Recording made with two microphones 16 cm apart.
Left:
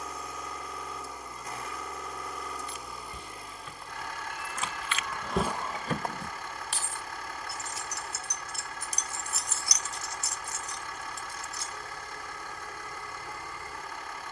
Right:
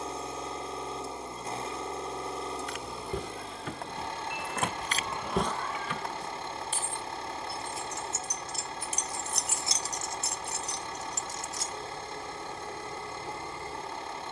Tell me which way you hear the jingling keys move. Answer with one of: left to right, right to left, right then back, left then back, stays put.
left then back.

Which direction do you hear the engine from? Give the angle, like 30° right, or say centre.
30° right.